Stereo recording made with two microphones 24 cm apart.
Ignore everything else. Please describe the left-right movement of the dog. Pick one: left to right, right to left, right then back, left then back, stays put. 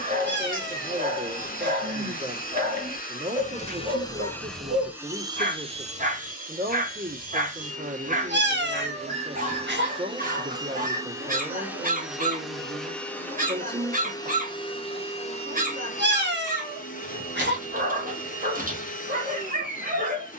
stays put.